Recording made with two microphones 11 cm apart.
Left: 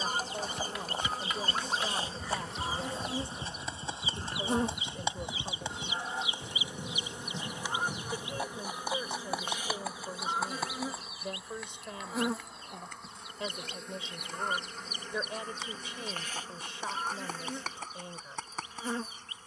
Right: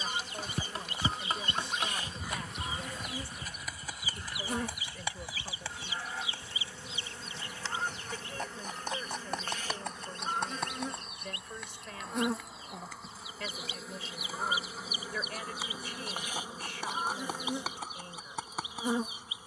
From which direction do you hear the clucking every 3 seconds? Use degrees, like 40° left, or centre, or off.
40° left, 20° left, 10° left, centre, centre, 10° right, 10° right.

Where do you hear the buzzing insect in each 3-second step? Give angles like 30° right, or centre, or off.
30° left, 30° left, 20° left, 10° left, centre, 10° right, 20° right.